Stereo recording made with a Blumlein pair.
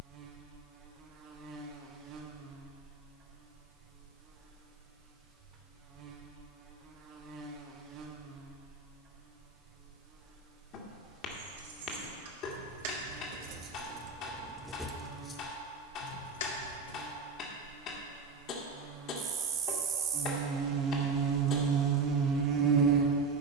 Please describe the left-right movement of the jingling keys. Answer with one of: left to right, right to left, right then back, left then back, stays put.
right to left.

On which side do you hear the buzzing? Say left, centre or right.
right.